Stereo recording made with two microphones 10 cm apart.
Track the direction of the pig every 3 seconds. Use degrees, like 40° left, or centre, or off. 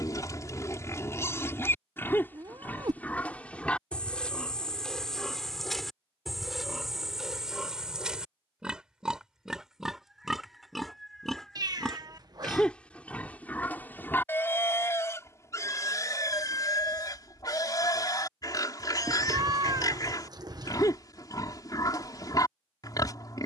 20° left, 10° left, centre, centre, 20° left, 30° left, 40° left, 40° left.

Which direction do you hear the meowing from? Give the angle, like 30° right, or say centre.
40° right.